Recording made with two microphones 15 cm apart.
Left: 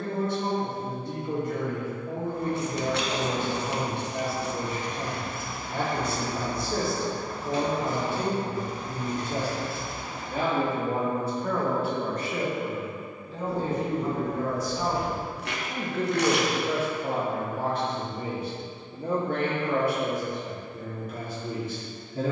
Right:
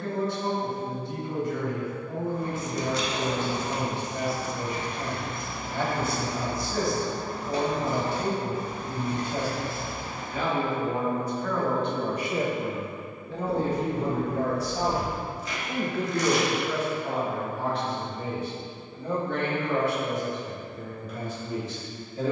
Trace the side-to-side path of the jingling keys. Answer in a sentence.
You can hear the jingling keys move from left to right.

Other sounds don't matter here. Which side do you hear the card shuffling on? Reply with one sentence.
In this clip you hear the card shuffling on the left.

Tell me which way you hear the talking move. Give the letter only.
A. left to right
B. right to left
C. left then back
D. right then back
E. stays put
D.